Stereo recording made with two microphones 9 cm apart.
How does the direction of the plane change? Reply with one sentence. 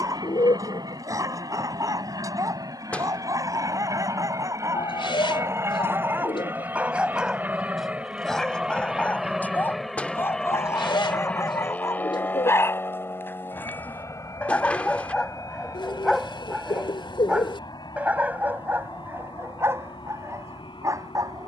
You can hear the plane go from the right side to the left.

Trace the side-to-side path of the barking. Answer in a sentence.
You can hear the barking go left and come back.